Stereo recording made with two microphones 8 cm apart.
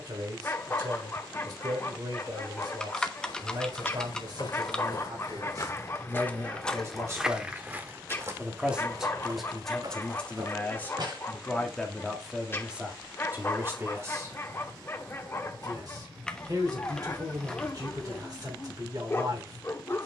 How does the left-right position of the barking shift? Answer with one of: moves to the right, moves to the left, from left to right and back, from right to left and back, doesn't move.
doesn't move.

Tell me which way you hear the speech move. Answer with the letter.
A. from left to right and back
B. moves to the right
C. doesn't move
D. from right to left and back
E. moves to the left
D.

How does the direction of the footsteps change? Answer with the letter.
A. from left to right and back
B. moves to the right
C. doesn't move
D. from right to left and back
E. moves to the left
B.